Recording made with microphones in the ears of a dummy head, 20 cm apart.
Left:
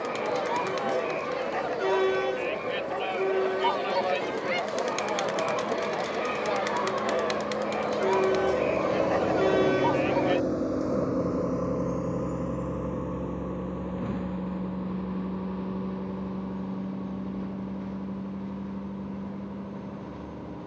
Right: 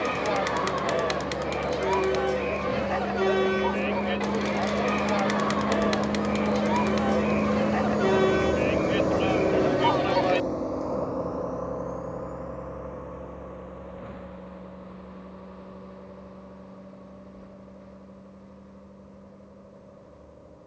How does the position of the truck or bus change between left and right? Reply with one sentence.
In this clip you hear the truck or bus go from the right side to the left.